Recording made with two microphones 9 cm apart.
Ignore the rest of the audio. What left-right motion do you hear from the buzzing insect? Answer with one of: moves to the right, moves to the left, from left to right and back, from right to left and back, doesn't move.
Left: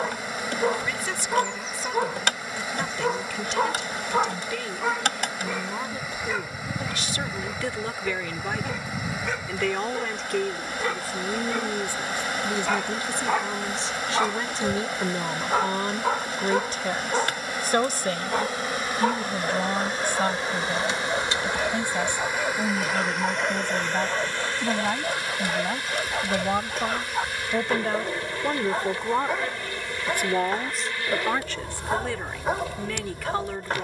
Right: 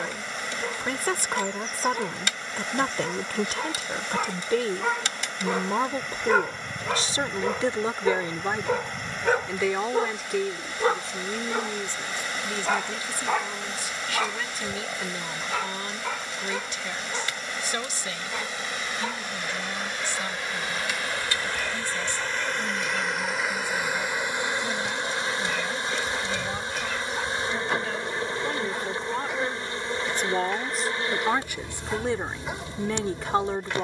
moves to the right.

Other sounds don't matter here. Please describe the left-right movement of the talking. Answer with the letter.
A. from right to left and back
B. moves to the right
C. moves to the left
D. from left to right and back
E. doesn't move
A.